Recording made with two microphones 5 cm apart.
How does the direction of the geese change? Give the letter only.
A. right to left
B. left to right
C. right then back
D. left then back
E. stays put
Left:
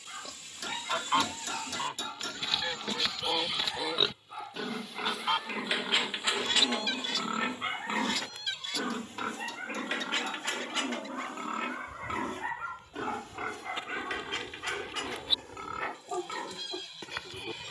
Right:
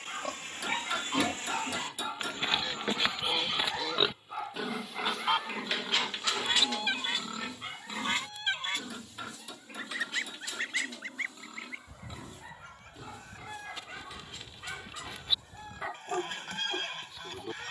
B.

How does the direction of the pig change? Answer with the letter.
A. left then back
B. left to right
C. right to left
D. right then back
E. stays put
C.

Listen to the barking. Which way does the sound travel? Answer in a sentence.
You can hear the barking go left and come back.